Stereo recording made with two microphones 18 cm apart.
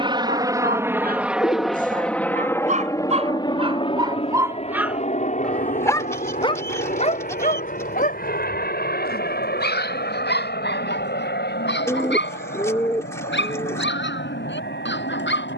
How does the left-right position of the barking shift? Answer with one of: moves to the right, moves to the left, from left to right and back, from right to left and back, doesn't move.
moves to the left.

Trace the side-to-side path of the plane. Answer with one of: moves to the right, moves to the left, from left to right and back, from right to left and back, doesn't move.
moves to the left.